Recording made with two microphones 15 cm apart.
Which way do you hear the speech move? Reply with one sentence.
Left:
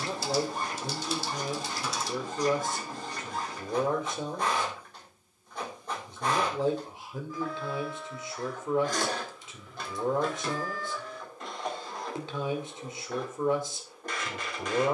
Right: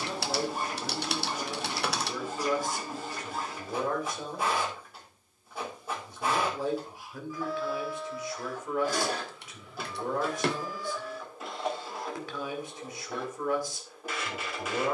In this clip you hear the speech stay in one place.